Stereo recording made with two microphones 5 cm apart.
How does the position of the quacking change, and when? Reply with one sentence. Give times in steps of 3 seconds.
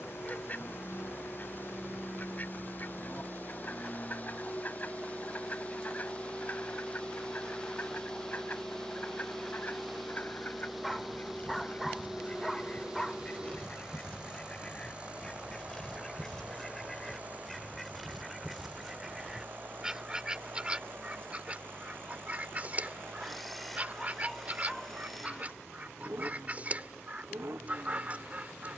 In this clip you hear the quacking on the left from 0 s, in the centre from 15 s and on the right from 21 s.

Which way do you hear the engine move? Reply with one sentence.
In this clip you hear the engine move from left to right.